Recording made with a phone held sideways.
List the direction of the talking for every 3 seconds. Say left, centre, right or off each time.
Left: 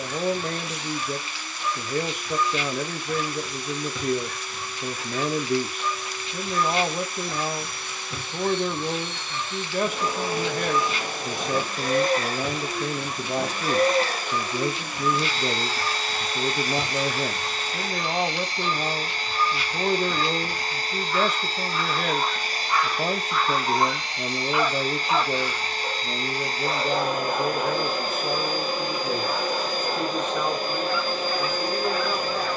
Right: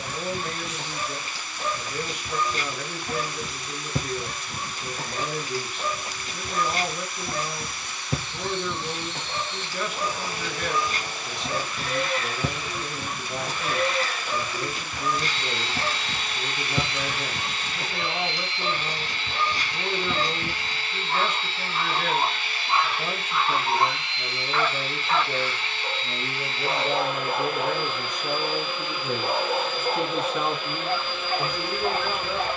left, left, left, left, left, left, left, left, left, centre, centre.